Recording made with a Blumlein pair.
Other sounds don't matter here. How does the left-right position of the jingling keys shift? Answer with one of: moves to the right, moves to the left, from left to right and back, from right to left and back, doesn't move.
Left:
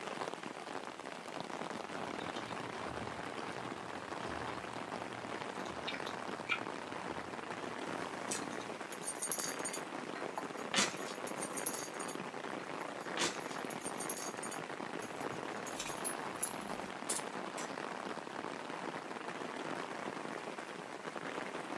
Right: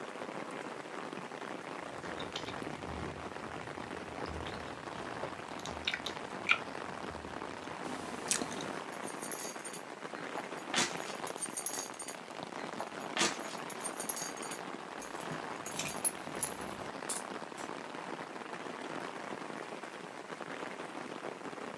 from left to right and back.